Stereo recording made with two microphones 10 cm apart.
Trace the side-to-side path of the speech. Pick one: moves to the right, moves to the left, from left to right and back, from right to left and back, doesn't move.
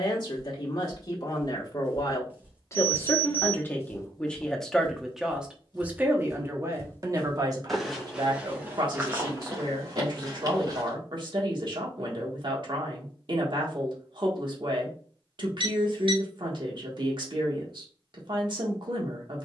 moves to the right.